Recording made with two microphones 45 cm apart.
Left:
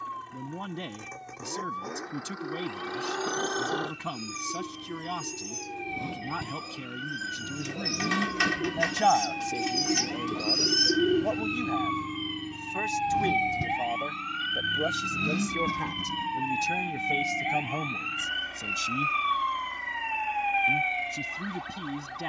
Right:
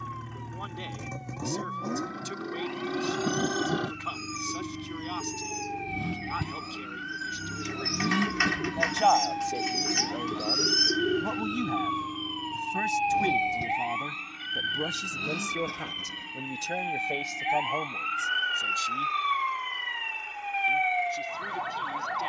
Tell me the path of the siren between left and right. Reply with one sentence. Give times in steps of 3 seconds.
In this clip you hear the siren on the left from 0 s, in the centre from 15 s and on the right from 18 s.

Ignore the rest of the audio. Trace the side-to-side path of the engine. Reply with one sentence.
In this clip you hear the engine move to the left.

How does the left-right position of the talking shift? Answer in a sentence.
You can hear the talking move from left to right and back again.